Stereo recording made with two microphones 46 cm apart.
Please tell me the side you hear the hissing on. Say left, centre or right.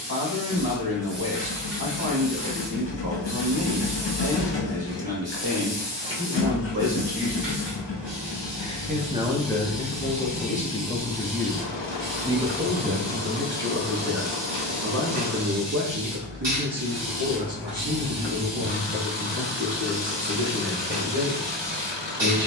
right.